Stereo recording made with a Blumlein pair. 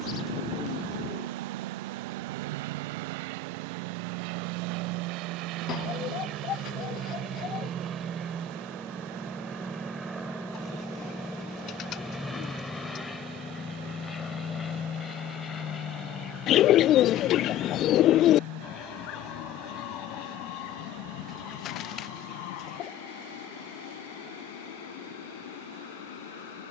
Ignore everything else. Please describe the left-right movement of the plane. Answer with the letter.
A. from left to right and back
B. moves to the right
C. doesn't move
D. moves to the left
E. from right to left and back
D.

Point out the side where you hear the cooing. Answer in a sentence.
In this clip you hear the cooing on the left.